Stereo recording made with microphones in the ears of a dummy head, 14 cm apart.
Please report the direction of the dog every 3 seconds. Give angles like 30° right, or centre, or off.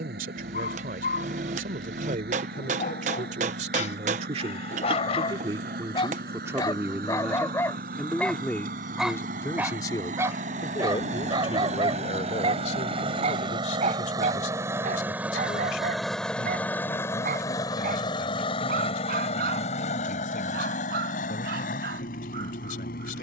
60° left, 50° left, 20° left, 20° right, 50° right, 60° right, 70° right, 70° right.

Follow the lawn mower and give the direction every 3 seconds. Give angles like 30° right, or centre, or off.
70° right, 70° right, 60° right, 50° right, 30° right, 10° left, 40° left, 60° left.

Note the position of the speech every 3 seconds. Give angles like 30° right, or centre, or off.
60° right, 40° right, 10° right, 30° left, 50° left, 60° left, 60° left, 60° left.